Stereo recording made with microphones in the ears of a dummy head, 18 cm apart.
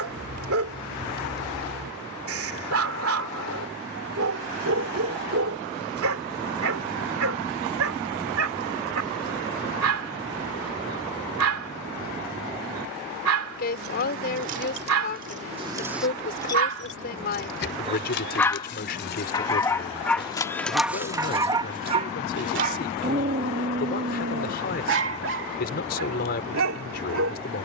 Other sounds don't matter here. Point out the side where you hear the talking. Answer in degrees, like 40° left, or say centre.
50° left.